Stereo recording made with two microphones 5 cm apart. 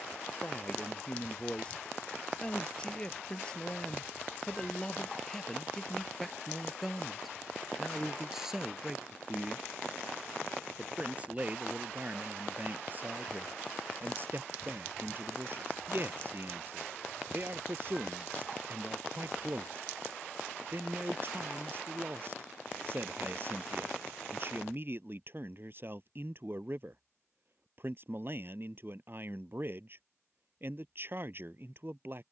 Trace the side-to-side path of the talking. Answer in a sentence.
You can hear the talking go from the left side to the right.